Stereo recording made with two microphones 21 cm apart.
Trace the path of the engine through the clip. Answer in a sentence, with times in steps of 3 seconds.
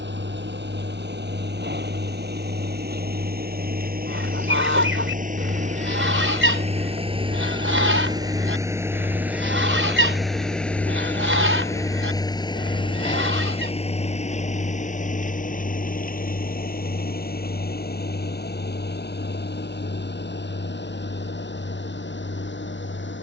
In this clip you hear the engine on the right from 0 s, in the centre from 9 s and on the left from 12 s.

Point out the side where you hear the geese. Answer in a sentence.
In this clip you hear the geese on the right.